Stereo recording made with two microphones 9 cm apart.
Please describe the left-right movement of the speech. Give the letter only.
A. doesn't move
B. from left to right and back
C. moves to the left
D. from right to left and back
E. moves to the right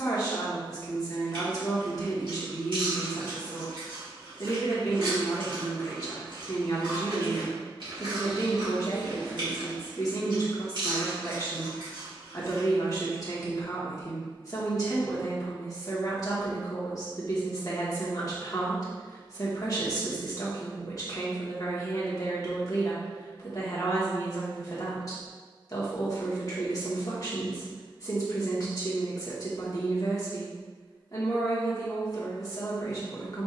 A.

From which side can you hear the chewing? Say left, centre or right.
right.